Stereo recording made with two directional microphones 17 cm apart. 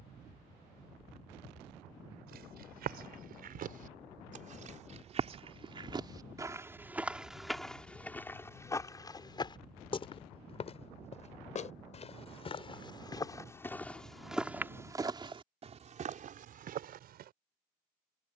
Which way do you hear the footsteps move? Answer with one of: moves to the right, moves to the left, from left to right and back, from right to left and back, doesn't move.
from right to left and back.